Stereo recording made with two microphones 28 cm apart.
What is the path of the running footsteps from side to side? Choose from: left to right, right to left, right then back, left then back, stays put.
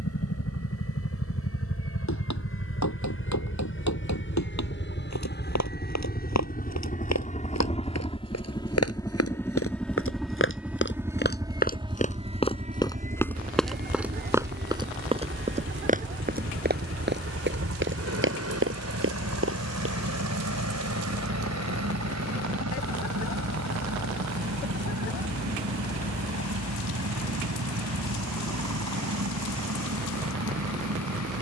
left to right.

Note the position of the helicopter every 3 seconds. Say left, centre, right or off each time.
left, left, left, centre, right, right, right, right, right, right, right.